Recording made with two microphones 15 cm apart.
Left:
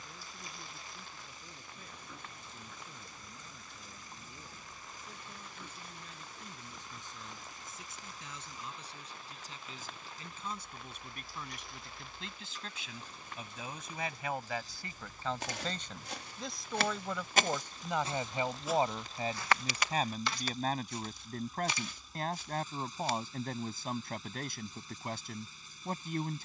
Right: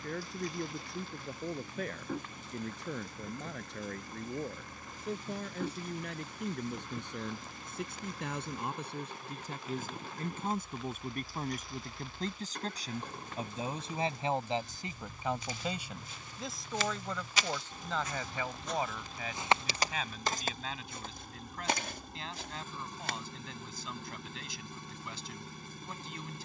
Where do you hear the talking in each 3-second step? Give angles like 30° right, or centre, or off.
70° right, 70° right, 60° right, 50° right, 30° right, centre, 30° left, 40° left, 40° left.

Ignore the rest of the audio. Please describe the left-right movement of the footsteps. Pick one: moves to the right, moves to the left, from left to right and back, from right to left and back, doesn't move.
moves to the right.